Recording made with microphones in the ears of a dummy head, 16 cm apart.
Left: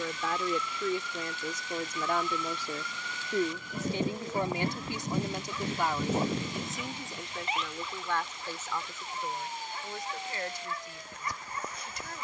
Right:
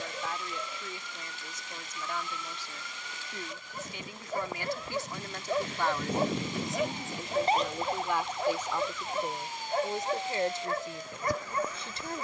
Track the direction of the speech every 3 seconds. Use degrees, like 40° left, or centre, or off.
50° left, 20° left, 10° right, 20° right.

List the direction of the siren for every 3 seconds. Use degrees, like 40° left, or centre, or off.
70° left, 40° left, 30° right, 70° right.